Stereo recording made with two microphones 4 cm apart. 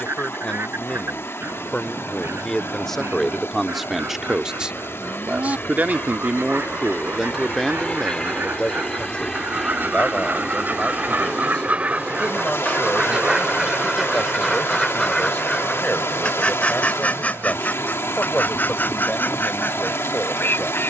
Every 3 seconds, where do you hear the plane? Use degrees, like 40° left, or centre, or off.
60° left, 50° left, 30° left, 10° right, 40° right, 60° right, 70° right.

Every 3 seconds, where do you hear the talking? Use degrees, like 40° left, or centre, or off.
20° left, 20° right, centre, 30° left, 30° left, 30° left, 30° left.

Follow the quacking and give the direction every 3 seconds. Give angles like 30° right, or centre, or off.
80° right, 70° right, 60° right, 50° right, 10° right, 30° left, 50° left.